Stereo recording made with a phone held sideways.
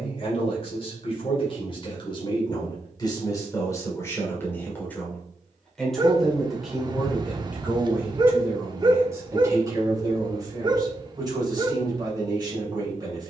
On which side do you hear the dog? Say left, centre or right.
right.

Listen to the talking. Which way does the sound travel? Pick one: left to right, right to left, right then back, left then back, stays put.
left to right.